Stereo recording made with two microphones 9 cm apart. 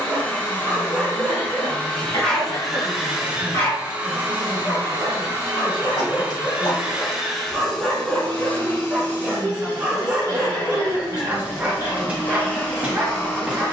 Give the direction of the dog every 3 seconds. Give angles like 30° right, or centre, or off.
10° right, 30° left, 10° left, 10° right, 10° right.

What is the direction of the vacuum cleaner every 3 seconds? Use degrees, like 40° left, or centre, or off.
20° left, 20° right, centre, 20° left, 20° left.